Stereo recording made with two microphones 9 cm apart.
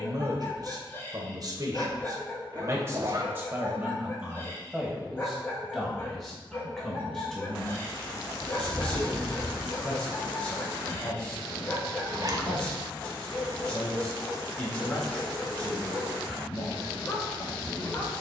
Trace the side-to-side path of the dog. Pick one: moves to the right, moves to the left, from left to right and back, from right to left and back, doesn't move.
doesn't move.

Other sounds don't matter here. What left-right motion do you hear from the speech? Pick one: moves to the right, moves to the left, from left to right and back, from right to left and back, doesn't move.
moves to the left.